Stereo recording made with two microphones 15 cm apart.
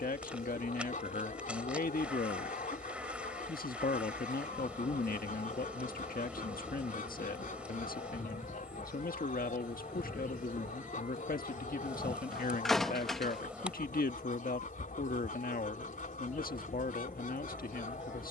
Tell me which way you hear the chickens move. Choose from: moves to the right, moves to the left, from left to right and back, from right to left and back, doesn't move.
doesn't move.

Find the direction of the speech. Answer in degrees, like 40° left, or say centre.
70° left.